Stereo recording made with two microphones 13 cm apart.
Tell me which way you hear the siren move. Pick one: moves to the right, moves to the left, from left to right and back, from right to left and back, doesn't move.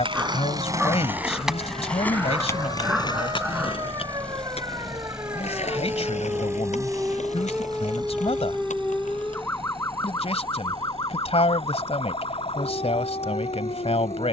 moves to the left.